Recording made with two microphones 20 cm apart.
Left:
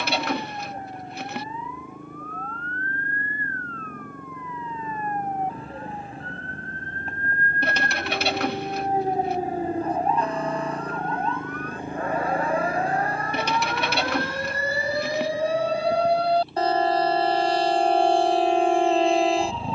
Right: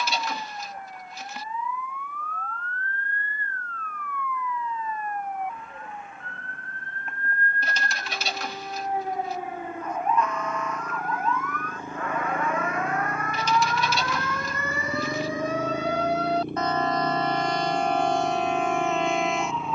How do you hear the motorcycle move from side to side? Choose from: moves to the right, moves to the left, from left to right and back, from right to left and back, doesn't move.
moves to the right.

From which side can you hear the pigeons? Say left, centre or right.
left.